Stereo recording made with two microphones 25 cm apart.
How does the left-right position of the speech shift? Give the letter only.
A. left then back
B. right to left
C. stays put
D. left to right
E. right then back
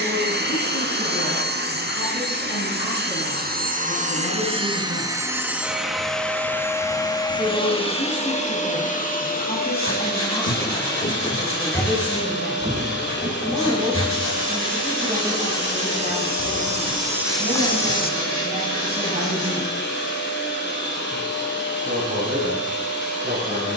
D.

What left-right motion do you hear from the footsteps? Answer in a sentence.
You can hear the footsteps move from left to right and back again.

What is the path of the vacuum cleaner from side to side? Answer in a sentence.
You can hear the vacuum cleaner move from right to left.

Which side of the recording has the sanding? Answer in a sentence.
You can hear the sanding on the left.